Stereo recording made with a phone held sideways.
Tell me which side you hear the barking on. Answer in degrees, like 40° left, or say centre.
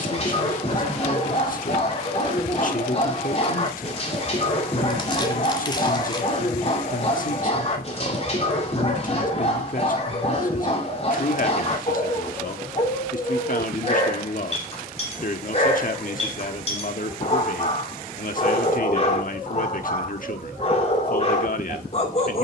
40° left.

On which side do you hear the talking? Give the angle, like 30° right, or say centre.
60° left.